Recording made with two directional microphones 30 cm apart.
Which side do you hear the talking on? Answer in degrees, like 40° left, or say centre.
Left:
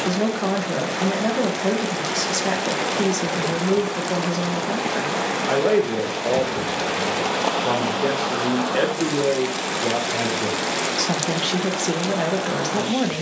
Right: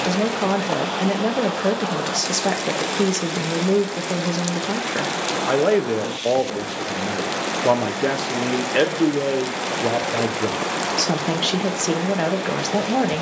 20° right.